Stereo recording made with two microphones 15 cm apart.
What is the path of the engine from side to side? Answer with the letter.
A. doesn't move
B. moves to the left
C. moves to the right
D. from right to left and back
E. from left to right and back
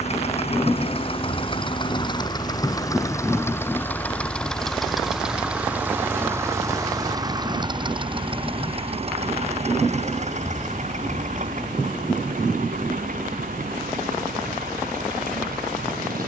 C.